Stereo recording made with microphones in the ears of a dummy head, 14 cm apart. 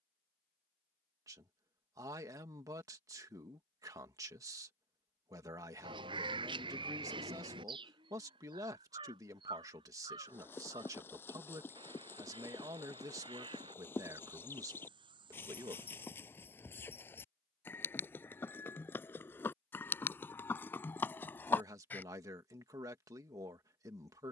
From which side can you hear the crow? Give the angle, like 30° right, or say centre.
30° right.